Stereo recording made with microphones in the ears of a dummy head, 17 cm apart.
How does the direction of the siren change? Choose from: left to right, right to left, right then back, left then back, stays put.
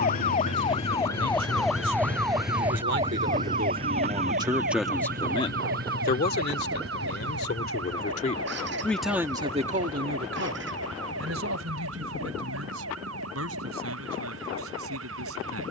left to right.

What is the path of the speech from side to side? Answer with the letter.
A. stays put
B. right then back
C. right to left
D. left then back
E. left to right
D.